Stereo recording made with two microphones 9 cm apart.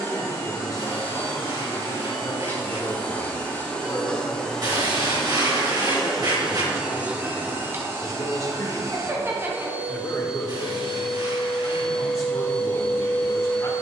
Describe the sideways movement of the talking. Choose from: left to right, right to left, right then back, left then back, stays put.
stays put.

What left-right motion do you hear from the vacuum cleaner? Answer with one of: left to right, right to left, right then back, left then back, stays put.
right then back.